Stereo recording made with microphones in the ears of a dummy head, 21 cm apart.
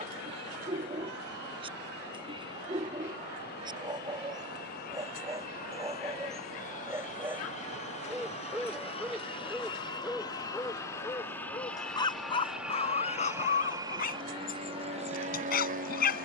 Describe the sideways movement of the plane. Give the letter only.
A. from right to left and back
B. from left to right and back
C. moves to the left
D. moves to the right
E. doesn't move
D.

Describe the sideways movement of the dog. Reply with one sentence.
You can hear the dog move from right to left.